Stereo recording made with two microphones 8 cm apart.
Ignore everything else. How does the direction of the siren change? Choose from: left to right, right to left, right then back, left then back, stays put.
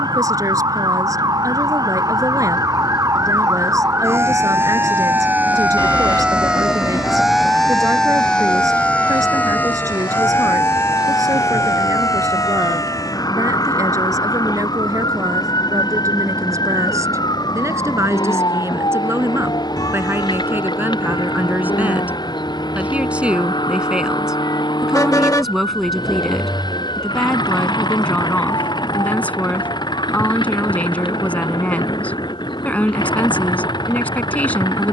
right to left.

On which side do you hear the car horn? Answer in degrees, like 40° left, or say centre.
50° left.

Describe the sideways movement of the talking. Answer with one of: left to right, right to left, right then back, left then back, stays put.
right to left.